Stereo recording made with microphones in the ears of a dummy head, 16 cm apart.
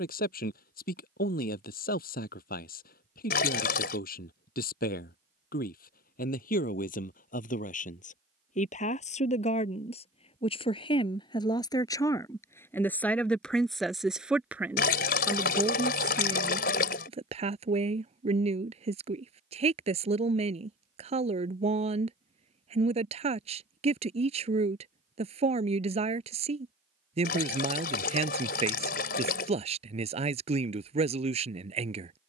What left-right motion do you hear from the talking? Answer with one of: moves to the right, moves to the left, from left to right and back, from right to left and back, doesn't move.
moves to the right.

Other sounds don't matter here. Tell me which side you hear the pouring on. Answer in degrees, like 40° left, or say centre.
60° left.